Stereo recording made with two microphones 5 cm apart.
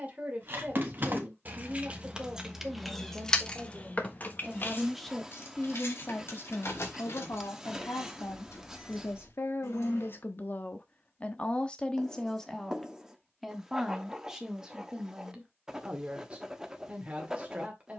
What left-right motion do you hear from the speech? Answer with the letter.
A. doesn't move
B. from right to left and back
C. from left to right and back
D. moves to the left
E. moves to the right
B.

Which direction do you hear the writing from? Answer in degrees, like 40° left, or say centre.
10° right.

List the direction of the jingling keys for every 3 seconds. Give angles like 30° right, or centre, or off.
30° right, 40° left, 70° left, 80° left, off, off.